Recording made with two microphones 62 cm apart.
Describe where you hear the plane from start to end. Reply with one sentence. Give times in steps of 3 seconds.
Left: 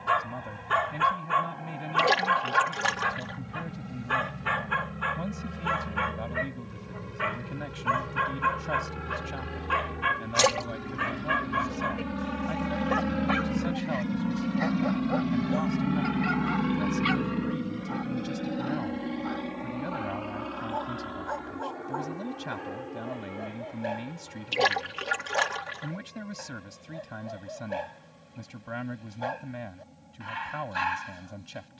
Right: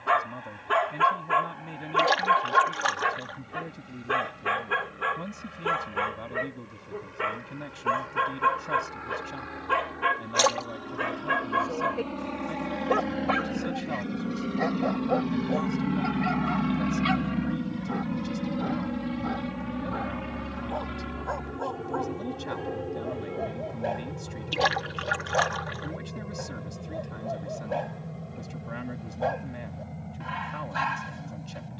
You can hear the plane on the left from 0 s, in the centre from 15 s and on the right from 18 s.